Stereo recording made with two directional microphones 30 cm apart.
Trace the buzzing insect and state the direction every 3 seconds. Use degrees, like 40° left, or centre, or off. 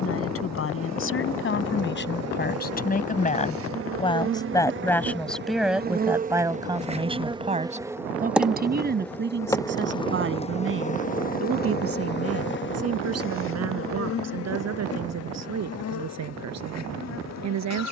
60° right, 40° right, 10° right, 20° left, 40° left, 60° left.